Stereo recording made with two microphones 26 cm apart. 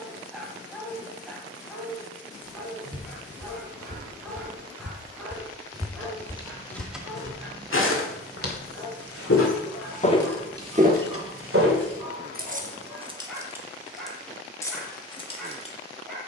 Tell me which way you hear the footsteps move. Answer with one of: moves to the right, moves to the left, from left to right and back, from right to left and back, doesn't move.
from right to left and back.